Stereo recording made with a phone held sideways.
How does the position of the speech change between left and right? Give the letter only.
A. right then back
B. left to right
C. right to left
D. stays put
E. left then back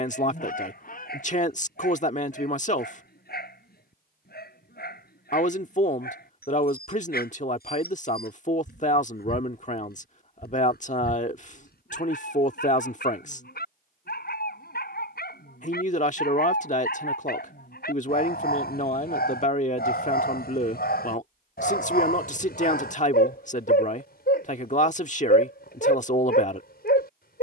D.